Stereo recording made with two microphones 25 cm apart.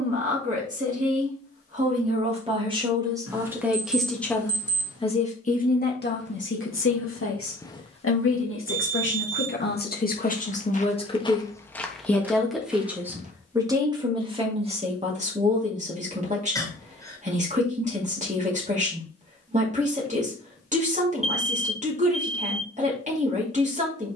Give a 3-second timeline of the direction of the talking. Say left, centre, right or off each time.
right, centre, left, left, centre, right, right, right.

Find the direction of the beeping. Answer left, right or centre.
right.